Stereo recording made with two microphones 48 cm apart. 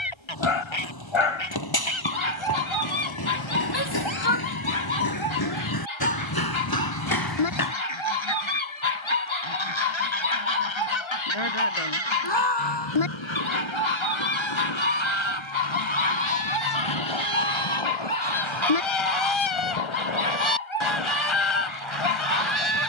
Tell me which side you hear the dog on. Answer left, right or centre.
left.